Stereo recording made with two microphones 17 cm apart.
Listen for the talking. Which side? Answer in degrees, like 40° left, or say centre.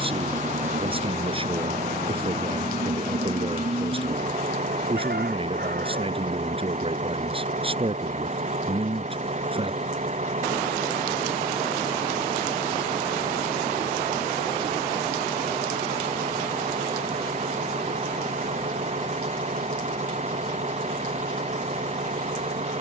30° right.